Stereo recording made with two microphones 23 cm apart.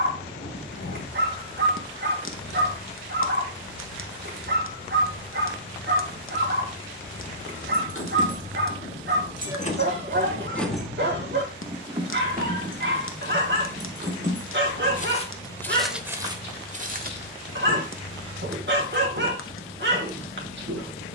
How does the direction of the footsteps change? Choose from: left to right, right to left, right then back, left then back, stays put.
left to right.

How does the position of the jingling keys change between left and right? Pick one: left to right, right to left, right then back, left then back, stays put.
left to right.